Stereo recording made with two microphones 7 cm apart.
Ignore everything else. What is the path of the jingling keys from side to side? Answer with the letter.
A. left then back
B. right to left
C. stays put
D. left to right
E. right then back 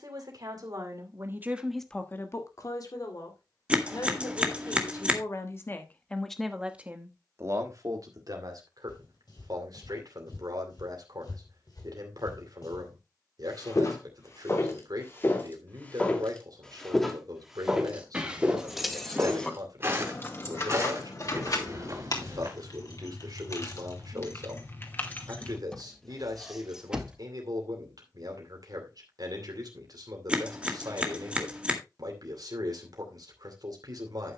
A.